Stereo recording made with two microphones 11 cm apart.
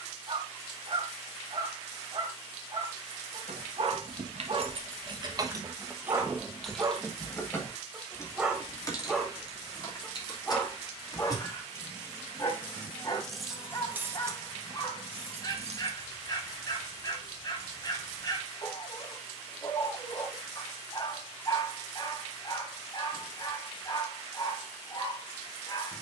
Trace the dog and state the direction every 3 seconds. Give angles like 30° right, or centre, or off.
50° right, 40° right, 20° right, 20° left, 30° left, 40° left, 40° left, 40° left, 40° left.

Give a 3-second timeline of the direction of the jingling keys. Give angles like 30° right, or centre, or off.
off, 50° right, 10° left, 30° left, 10° right, 60° right, off, off, off.